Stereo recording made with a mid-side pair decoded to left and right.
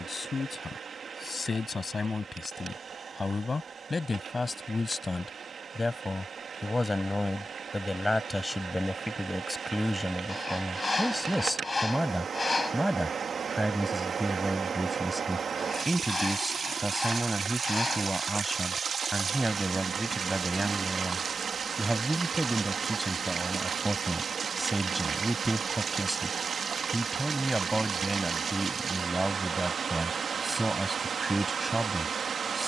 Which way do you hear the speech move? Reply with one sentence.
In this clip you hear the speech go from the left side to the right.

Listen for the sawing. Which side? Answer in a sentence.
In this clip you hear the sawing on the left.